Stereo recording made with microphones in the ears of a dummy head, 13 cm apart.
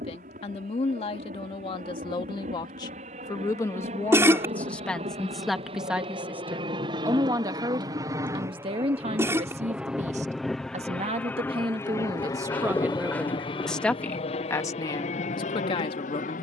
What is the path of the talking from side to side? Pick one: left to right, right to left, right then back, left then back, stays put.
right then back.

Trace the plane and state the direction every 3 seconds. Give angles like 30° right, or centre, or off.
60° right, 50° right, 30° right, centre, 30° left, 50° left.